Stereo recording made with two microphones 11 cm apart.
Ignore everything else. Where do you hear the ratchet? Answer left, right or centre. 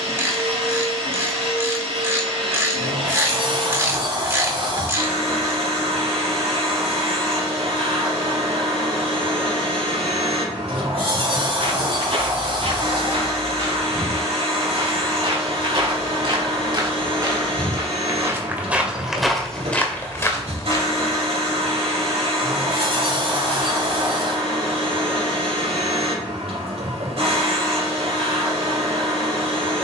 right.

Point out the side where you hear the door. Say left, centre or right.
right.